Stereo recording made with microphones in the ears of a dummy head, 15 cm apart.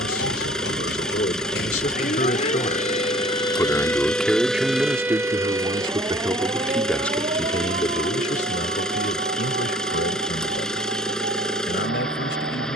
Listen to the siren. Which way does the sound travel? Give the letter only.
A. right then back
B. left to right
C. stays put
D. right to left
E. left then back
B.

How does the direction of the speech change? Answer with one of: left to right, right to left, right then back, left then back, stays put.
right then back.